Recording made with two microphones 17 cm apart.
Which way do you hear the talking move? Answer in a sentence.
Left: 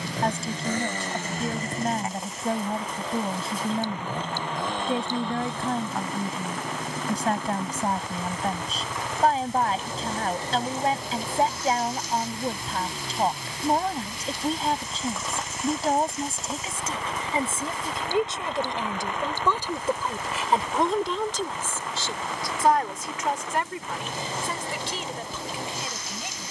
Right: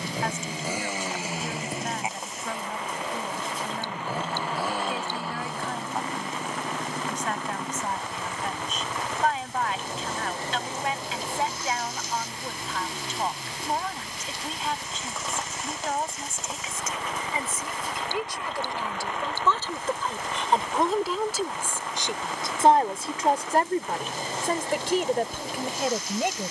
In this clip you hear the talking move to the right.